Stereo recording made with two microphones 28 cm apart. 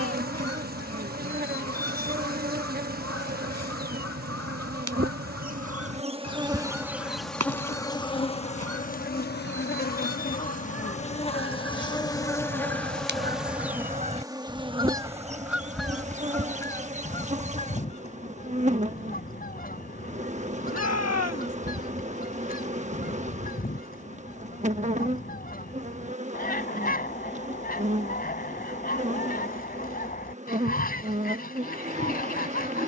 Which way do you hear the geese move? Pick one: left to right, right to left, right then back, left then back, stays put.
right to left.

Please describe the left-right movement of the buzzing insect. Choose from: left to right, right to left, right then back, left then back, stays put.
left then back.